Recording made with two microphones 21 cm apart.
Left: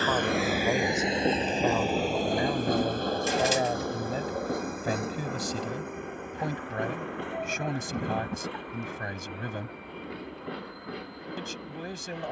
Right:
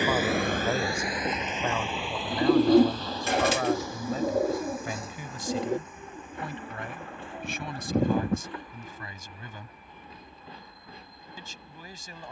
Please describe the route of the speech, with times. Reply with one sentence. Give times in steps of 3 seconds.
You can hear the speech in the centre from 0 s and on the left from 3 s.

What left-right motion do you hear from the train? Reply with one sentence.
You can hear the train go from the right side to the left.